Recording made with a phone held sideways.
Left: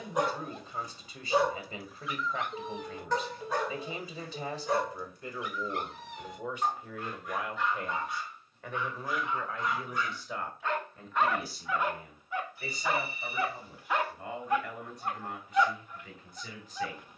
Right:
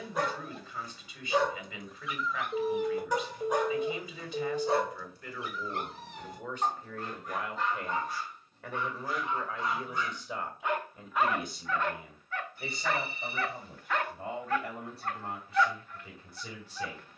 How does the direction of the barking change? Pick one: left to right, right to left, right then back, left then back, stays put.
right then back.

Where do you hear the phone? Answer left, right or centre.
right.